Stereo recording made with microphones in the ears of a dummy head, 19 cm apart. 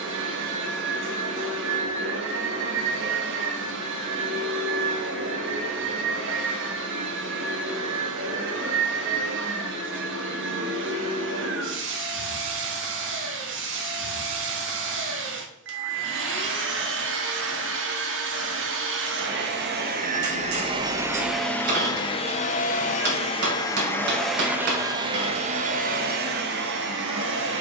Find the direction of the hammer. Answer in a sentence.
You can hear the hammer on the right.